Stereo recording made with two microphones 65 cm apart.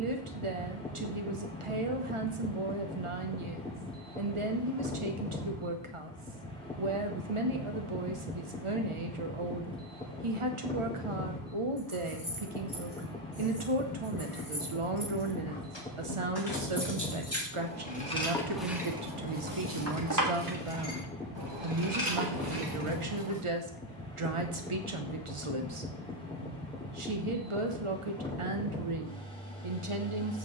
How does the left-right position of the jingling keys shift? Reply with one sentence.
You can hear the jingling keys move from left to right.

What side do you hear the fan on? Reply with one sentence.
You can hear the fan in the centre.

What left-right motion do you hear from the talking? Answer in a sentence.
In this clip you hear the talking stay in one place.